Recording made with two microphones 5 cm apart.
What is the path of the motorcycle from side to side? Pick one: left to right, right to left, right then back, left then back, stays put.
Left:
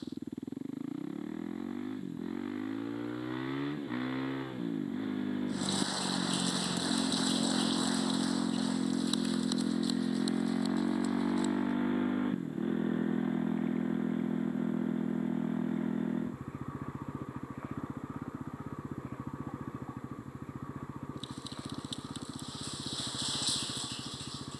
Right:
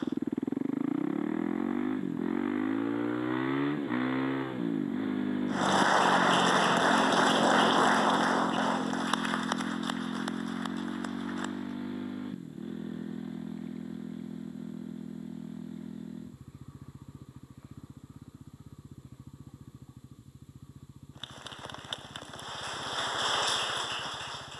right to left.